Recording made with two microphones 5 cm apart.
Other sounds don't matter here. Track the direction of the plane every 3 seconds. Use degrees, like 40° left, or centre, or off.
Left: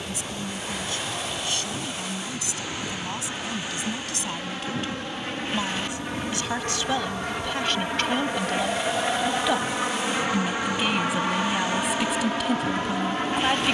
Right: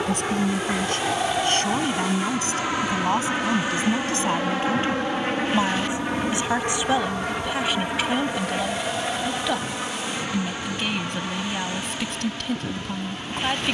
60° right, 40° right, 10° right, 20° left, 40° left.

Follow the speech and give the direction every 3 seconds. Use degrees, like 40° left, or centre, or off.
50° right, 40° right, 10° right, 10° left, 10° left.